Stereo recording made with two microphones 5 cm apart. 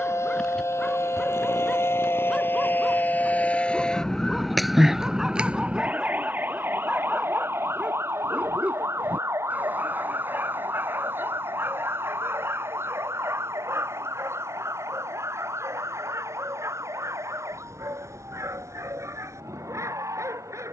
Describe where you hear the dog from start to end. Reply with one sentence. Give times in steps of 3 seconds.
You can hear the dog in the centre from 0 s and on the right from 6 s.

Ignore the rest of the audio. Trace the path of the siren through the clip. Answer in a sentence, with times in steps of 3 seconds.
You can hear the siren on the left from 0 s, in the centre from 3 s and on the right from 6 s.